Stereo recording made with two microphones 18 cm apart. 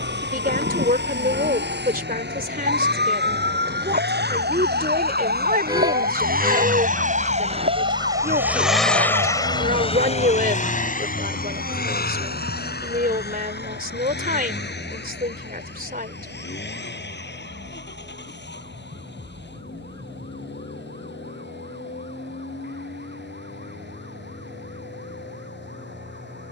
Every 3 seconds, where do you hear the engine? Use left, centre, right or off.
right, right, right, left, left, left, left, left, left.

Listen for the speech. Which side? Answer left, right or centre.
right.